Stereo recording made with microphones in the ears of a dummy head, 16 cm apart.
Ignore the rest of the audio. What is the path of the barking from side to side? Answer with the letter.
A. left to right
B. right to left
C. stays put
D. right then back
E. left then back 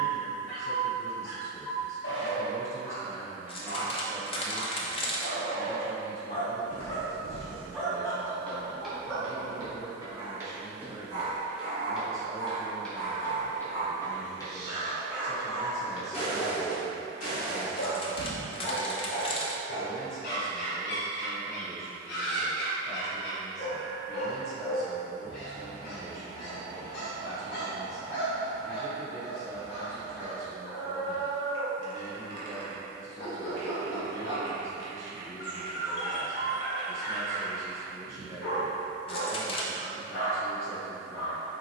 D.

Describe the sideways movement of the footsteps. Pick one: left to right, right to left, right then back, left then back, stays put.
right then back.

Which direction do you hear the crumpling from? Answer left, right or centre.
left.